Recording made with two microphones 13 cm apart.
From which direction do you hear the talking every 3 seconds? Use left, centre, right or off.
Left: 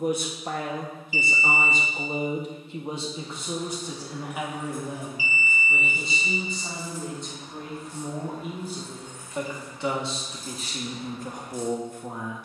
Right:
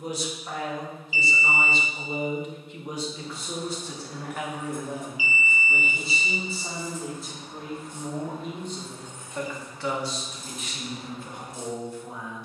left, centre, centre, left.